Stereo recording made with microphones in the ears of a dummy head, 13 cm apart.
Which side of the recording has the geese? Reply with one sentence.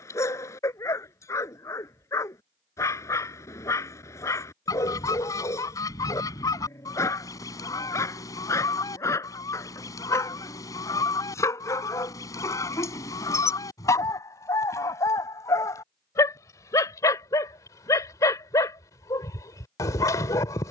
You can hear the geese on the left.